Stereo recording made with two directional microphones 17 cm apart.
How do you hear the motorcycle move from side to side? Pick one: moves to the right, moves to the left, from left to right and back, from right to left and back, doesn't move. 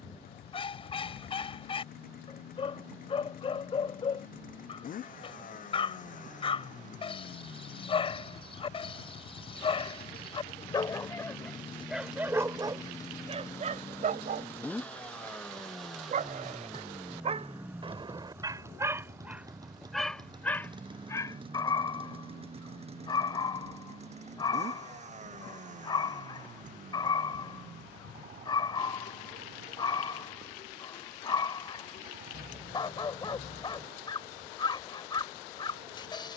moves to the right.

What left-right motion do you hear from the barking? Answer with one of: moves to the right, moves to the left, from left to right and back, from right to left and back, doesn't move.
from left to right and back.